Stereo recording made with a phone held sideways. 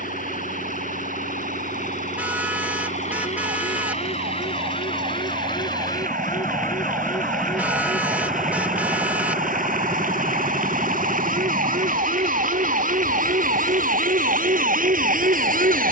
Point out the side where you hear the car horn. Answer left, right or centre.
centre.